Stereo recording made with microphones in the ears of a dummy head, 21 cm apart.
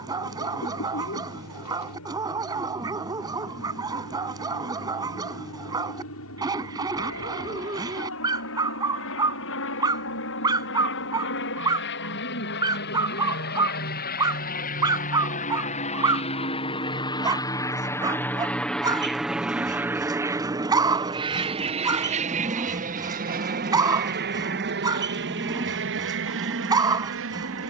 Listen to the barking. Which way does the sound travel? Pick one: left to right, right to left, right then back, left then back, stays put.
stays put.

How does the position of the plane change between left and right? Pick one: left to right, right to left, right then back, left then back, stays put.
left to right.